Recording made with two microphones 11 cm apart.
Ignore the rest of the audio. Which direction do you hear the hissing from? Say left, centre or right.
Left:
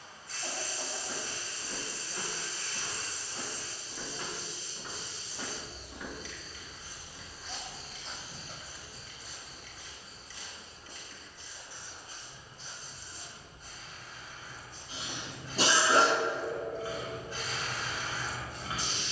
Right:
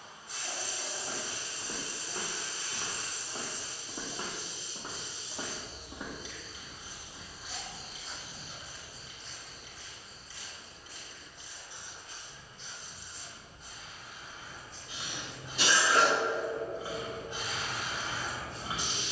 right.